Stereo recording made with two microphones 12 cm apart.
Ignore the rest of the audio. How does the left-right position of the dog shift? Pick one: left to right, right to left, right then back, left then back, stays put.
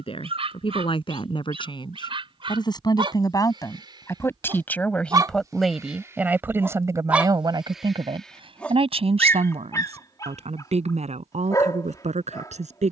right to left.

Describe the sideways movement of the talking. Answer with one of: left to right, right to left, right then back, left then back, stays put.
left to right.